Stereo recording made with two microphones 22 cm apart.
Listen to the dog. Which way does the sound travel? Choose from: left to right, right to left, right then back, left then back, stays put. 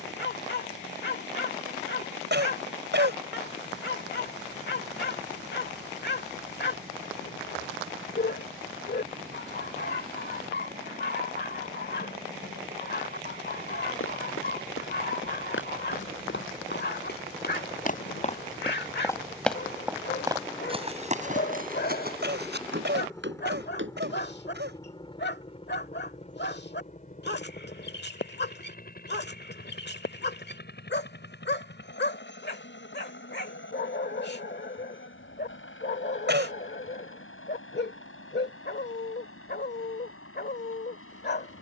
stays put.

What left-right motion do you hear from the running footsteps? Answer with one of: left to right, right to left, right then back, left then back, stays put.
left to right.